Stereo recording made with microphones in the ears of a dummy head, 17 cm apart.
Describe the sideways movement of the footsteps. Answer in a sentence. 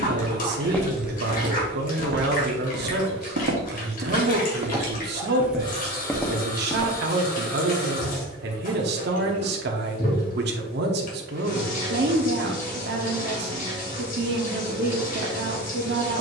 In this clip you hear the footsteps go right and come back.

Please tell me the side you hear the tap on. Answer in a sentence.
You can hear the tap on the left.